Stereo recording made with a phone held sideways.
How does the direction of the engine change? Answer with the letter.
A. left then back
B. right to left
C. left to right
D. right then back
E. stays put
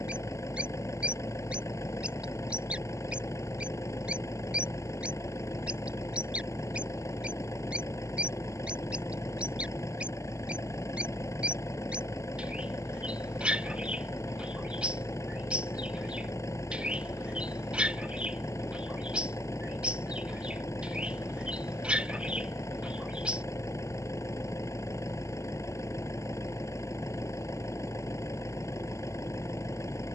E.